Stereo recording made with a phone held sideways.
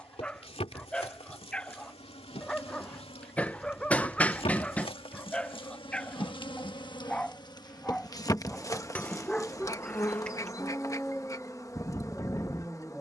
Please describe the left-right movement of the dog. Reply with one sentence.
In this clip you hear the dog stay put.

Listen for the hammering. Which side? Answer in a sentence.
In this clip you hear the hammering in the centre.